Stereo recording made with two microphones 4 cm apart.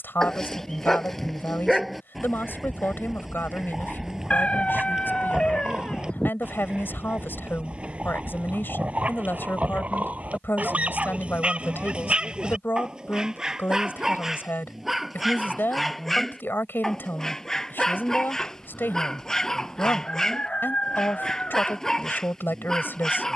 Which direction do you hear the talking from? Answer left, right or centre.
left.